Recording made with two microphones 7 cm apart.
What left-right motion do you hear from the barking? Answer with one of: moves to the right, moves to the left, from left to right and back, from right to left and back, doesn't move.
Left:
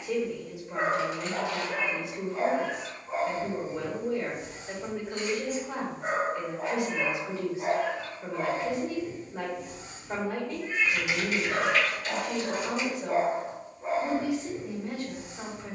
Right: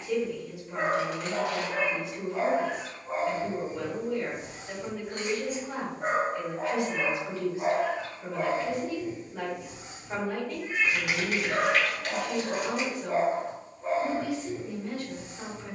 from left to right and back.